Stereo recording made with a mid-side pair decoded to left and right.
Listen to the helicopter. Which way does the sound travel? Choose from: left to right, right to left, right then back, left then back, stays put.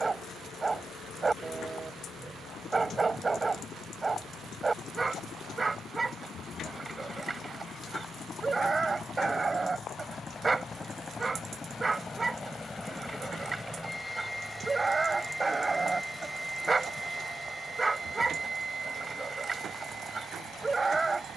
left to right.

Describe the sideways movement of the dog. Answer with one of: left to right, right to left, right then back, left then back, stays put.
stays put.